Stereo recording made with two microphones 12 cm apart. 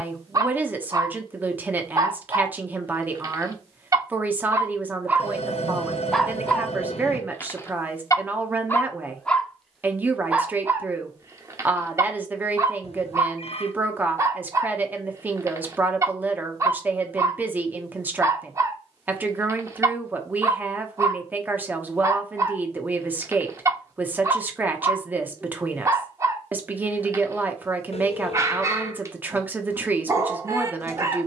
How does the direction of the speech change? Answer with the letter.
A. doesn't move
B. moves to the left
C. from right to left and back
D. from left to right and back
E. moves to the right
A.